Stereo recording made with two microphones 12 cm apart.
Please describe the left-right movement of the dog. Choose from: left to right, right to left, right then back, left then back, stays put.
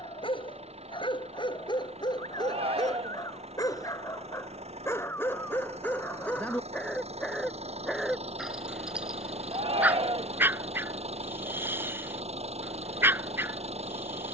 left to right.